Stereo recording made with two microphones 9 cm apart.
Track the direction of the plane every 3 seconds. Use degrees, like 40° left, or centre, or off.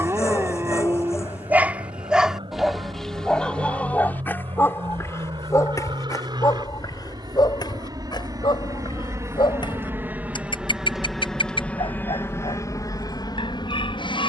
70° right, 60° right, 50° right, 10° right, 40° left.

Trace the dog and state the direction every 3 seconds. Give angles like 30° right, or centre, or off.
20° right, 20° left, 50° left, 60° left, 60° left.